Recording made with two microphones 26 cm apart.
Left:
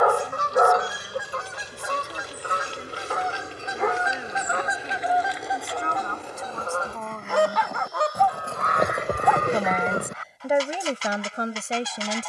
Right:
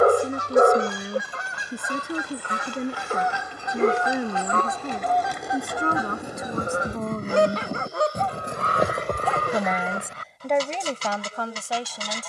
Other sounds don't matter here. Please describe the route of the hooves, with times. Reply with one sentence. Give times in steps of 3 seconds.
You can hear the hooves on the right from 0 s and on the left from 9 s.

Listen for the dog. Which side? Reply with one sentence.
In this clip you hear the dog on the right.